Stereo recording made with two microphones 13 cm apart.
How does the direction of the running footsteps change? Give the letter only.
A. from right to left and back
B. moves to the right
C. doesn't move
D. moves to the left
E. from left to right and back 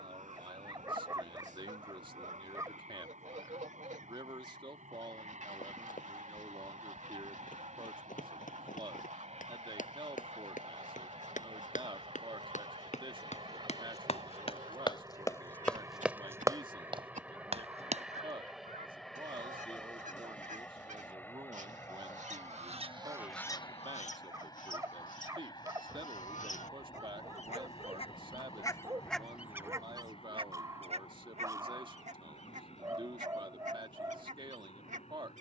B.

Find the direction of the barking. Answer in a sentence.
In this clip you hear the barking on the right.